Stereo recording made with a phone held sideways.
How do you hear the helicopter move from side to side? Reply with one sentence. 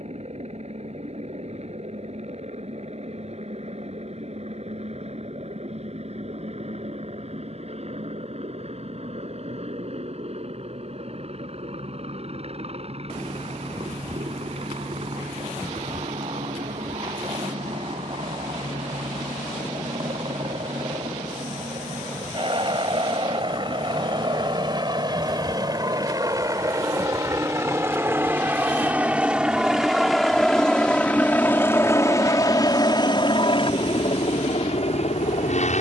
In this clip you hear the helicopter move from right to left.